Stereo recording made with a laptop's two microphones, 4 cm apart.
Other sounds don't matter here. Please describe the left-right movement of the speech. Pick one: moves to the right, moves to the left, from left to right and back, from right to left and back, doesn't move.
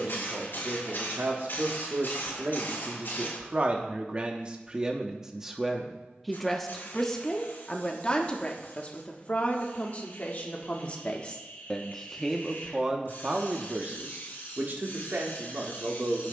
from right to left and back.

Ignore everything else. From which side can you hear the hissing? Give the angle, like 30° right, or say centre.
60° left.